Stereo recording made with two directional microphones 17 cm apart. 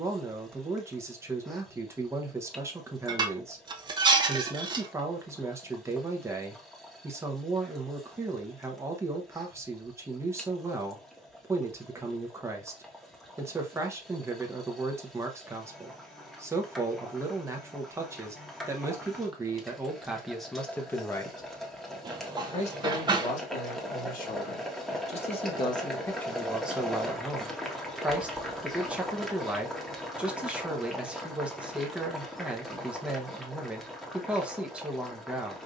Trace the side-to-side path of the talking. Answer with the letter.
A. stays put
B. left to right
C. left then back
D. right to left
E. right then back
C.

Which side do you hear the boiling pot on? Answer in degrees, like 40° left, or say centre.
centre.